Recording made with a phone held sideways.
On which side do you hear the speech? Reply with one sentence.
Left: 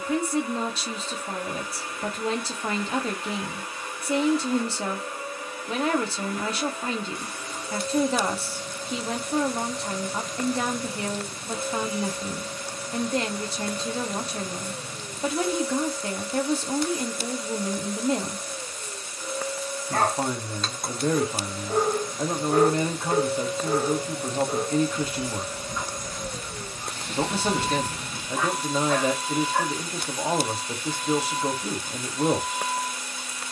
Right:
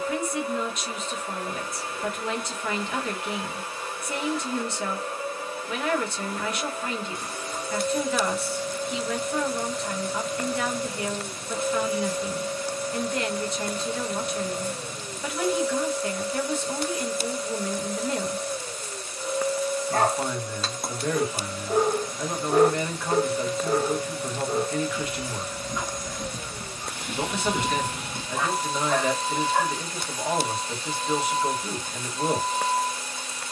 You can hear the speech on the left.